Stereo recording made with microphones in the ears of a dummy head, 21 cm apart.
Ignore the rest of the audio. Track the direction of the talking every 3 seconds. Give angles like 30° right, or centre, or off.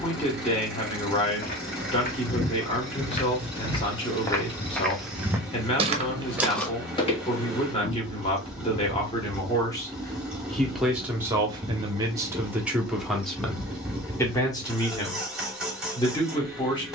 20° left, 20° left, 20° left, centre, centre, 20° left.